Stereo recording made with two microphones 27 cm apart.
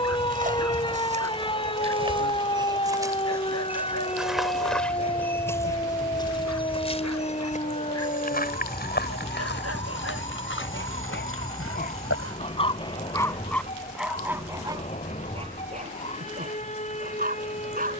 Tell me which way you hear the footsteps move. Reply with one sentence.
You can hear the footsteps go from the right side to the left.